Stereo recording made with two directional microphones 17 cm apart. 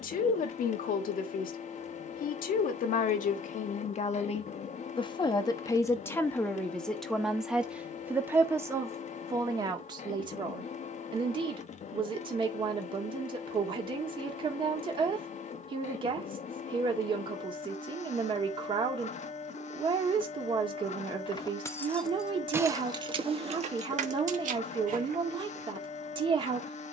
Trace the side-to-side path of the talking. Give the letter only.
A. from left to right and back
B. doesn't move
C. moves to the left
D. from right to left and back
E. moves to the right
E.